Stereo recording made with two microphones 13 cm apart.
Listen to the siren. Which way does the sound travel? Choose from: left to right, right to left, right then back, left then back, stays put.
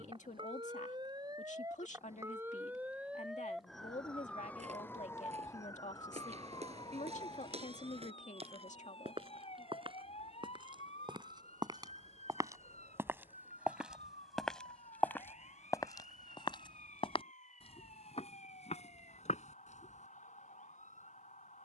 right to left.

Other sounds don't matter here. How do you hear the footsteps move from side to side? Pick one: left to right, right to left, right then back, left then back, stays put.
right to left.